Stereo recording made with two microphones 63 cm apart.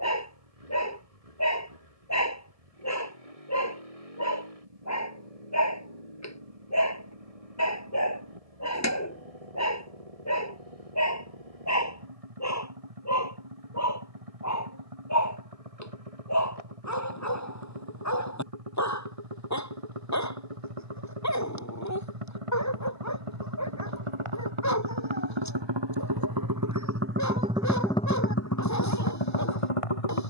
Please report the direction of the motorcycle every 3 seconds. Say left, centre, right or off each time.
right, right, right, right, right, right, right, right, right, left.